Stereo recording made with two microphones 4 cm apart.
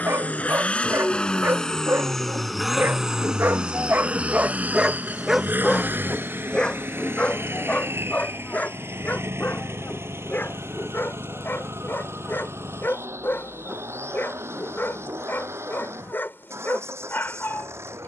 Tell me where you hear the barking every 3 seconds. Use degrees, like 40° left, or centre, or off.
70° right, 30° right, 30° left, 50° left, 50° left, 50° left.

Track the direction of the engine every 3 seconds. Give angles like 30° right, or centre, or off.
20° left, 30° right, 60° right, 70° right, 80° right, 80° right.